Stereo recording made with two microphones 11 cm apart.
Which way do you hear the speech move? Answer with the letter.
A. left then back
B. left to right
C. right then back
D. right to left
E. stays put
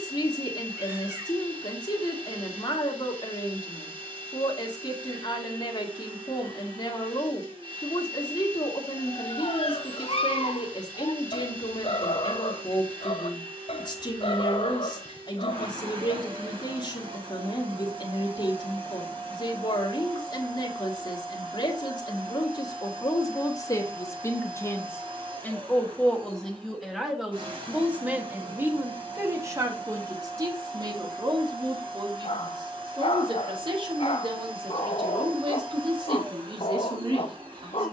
B.